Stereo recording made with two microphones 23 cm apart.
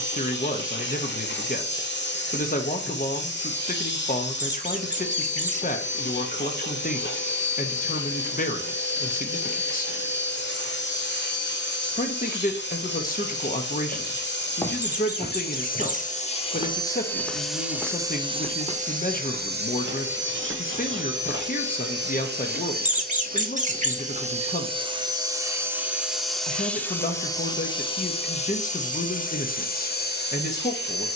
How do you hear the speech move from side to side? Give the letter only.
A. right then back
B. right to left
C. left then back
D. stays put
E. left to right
D.